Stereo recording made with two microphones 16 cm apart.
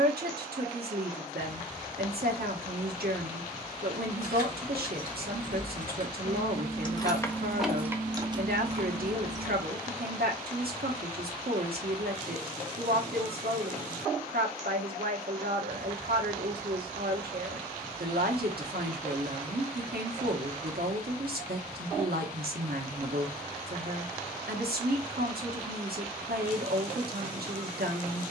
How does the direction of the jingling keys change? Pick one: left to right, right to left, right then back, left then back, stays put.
left to right.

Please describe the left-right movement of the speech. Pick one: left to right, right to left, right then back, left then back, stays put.
stays put.